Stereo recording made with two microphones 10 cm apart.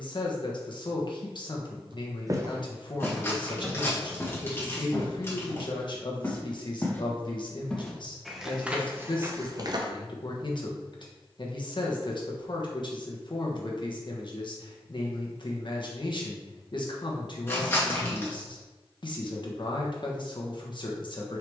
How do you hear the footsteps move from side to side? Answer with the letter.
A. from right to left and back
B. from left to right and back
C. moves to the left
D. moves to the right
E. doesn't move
A.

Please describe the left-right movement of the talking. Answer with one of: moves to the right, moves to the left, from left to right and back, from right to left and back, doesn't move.
doesn't move.